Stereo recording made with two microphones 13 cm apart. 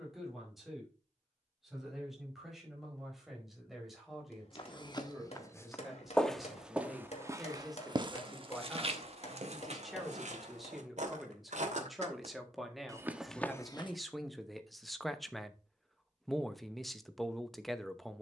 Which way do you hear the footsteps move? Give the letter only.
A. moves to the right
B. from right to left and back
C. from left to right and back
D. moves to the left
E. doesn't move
C.